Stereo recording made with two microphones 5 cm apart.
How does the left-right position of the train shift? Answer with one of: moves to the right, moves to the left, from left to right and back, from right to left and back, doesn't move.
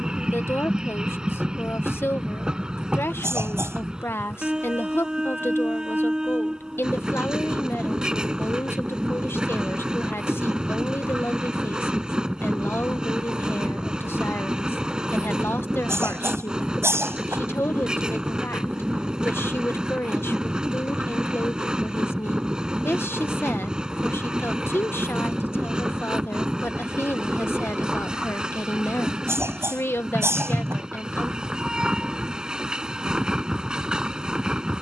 doesn't move.